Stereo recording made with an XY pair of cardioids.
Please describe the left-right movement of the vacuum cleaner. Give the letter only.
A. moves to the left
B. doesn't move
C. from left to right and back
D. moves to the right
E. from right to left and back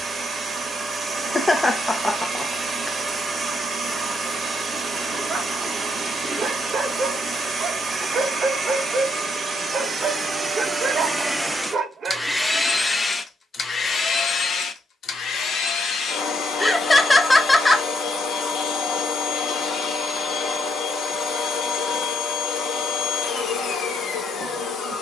A.